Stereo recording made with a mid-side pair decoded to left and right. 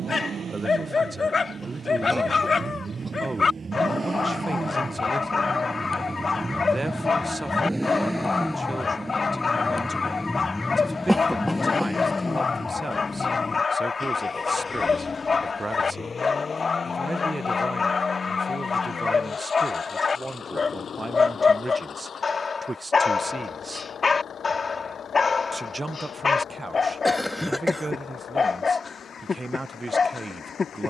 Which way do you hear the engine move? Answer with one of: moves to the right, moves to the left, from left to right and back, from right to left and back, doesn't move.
moves to the left.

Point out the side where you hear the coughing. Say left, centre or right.
centre.